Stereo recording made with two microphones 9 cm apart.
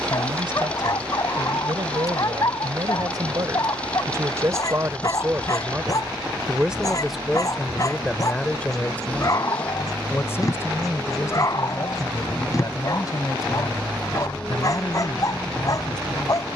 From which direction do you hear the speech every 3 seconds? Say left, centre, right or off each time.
right, right, centre, left, left, left.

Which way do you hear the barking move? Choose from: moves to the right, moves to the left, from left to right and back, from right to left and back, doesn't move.
doesn't move.